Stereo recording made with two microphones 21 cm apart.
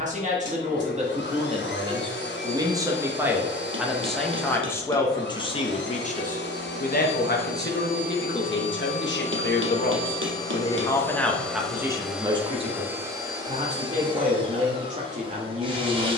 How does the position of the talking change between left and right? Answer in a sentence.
In this clip you hear the talking go left and come back.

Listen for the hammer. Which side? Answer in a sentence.
In this clip you hear the hammer on the right.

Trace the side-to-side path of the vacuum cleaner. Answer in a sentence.
In this clip you hear the vacuum cleaner go from the left side to the right.